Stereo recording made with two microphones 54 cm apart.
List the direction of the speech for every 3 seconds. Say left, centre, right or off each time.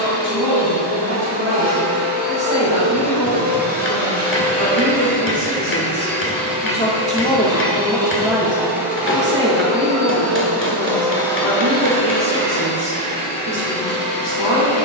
left, left, centre, right, right.